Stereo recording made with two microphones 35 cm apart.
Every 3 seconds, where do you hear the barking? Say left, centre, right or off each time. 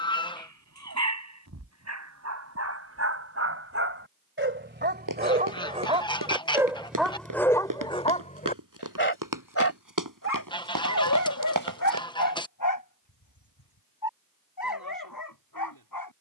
right, right, centre, left, left, left.